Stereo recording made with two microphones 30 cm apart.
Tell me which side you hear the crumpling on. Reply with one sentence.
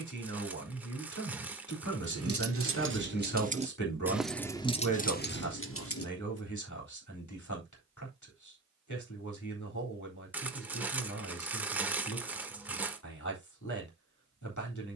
You can hear the crumpling in the centre.